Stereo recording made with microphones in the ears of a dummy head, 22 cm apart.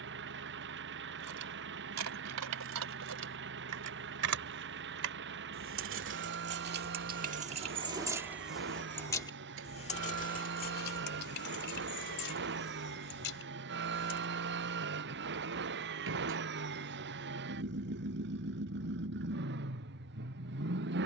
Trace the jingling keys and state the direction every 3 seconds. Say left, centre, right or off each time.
right, right, right, left, left, off, off.